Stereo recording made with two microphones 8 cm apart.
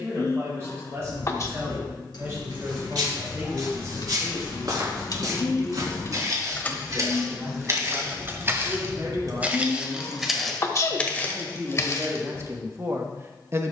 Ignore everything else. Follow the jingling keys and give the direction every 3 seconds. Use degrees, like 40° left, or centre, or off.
70° left, 60° left, 10° right, 50° right, off.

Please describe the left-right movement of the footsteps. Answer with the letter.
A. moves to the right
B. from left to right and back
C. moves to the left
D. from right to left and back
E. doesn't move
C.